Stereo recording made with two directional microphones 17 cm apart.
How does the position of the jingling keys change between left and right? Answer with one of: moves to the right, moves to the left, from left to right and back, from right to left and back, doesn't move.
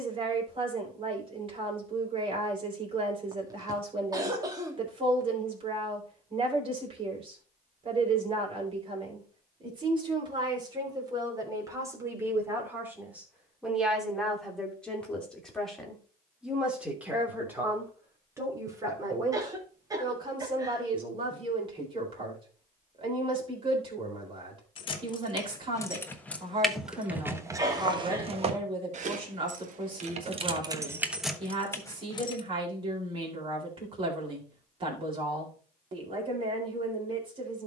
from left to right and back.